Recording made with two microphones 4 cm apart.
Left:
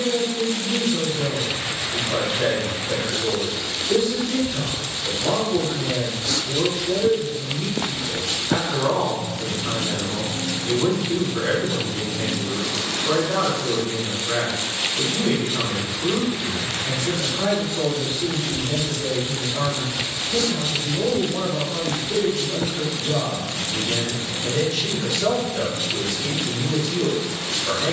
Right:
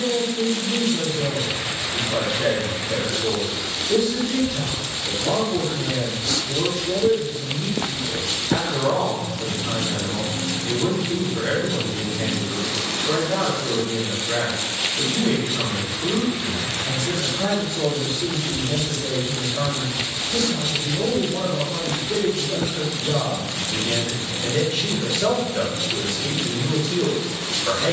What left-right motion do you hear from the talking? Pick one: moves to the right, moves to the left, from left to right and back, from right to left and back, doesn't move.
moves to the right.